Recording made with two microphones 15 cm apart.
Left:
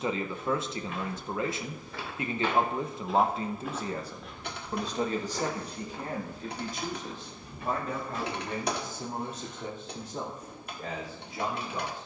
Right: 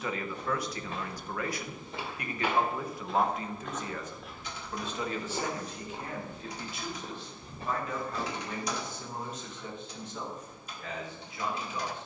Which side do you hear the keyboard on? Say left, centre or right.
left.